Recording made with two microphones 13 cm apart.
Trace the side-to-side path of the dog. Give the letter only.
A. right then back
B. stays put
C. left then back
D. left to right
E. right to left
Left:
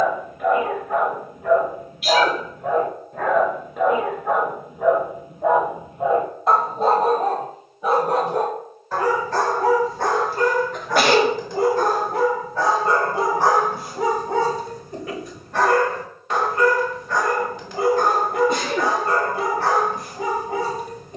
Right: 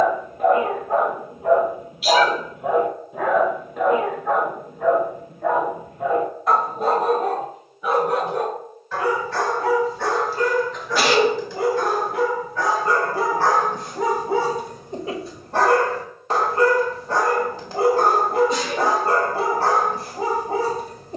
C.